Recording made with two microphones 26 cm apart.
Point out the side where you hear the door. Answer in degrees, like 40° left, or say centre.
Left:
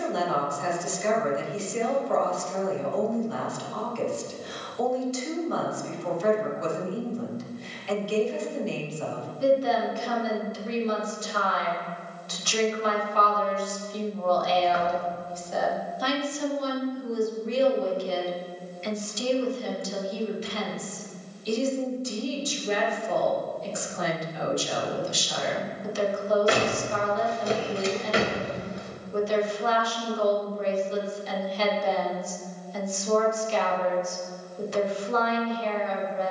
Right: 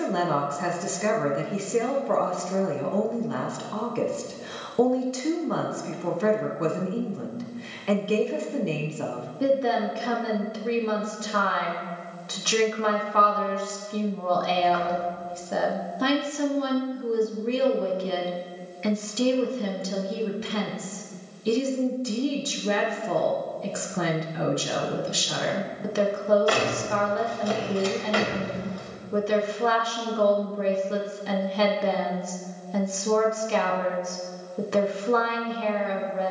20° left.